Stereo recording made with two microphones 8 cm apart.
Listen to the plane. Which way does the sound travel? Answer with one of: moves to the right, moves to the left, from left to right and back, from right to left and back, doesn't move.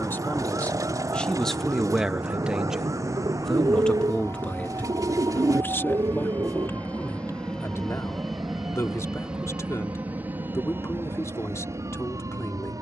moves to the right.